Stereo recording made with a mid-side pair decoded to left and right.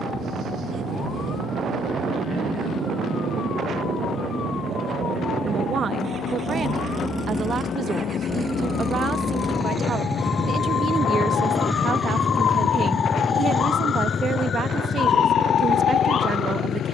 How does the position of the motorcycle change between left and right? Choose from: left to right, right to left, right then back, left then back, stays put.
right to left.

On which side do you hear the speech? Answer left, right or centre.
right.